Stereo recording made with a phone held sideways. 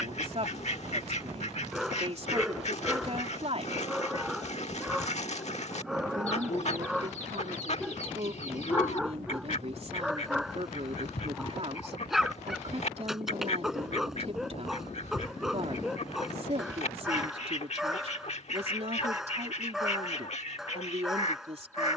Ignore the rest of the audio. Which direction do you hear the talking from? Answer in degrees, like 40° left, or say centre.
40° right.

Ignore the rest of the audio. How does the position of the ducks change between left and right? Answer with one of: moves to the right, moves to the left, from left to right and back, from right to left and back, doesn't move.
doesn't move.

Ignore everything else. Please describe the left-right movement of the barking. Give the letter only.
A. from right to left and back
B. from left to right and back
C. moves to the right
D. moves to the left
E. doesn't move
E.